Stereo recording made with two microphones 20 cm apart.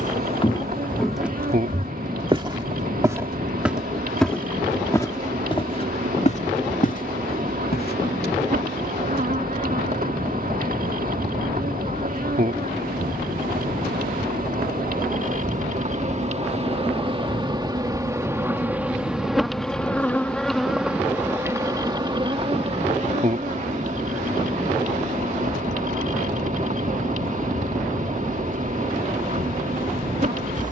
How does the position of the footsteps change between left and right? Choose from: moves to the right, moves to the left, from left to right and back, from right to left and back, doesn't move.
from left to right and back.